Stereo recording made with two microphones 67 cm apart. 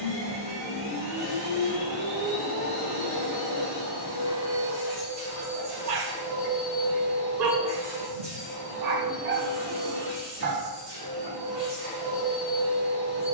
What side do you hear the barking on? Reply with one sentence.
In this clip you hear the barking on the right.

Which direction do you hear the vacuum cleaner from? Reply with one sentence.
In this clip you hear the vacuum cleaner on the left.